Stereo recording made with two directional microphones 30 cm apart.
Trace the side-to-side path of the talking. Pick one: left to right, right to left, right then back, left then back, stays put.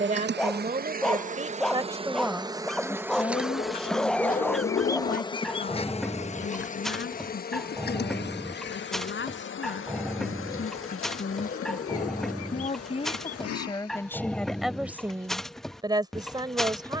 left then back.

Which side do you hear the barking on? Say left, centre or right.
centre.